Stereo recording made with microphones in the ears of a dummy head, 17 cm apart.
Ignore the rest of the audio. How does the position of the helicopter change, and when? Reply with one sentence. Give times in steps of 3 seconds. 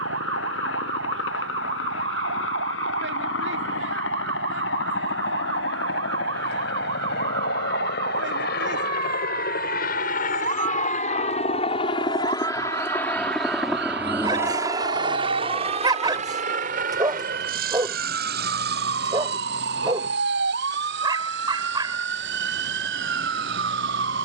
You can hear the helicopter on the left from 0 s, in the centre from 12 s and on the right from 15 s.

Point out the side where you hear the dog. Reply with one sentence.
In this clip you hear the dog on the right.